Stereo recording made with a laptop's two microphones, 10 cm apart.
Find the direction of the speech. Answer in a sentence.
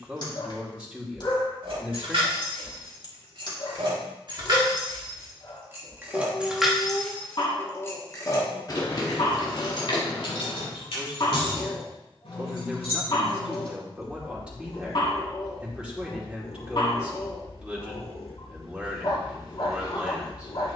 In this clip you hear the speech in the centre.